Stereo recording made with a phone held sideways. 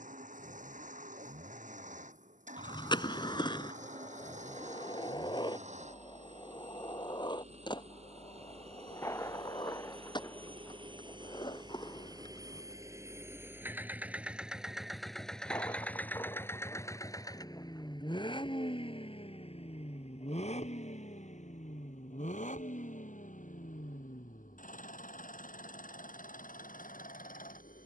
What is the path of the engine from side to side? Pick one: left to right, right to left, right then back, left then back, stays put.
right to left.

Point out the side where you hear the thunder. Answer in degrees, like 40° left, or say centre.
20° left.